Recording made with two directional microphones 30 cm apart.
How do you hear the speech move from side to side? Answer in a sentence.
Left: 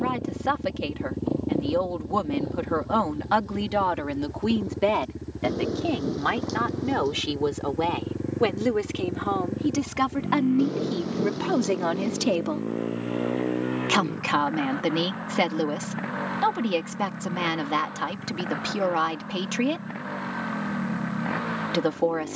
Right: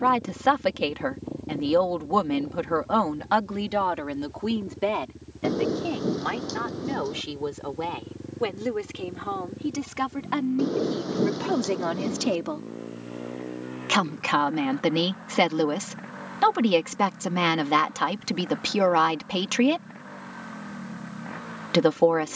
You can hear the speech move from right to left and back again.